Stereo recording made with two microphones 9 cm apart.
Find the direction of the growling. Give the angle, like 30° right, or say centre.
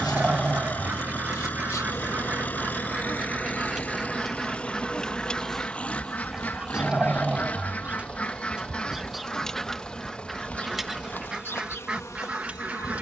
10° right.